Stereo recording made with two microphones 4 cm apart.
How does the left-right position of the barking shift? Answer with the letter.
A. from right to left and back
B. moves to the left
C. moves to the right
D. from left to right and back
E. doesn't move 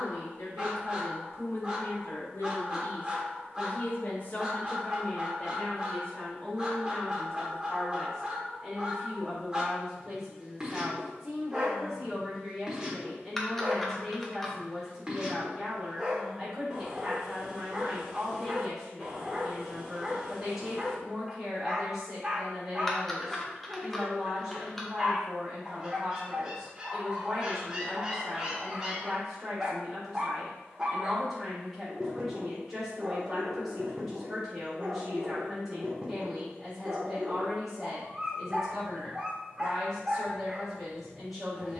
E.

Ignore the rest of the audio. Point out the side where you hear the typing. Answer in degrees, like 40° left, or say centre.
centre.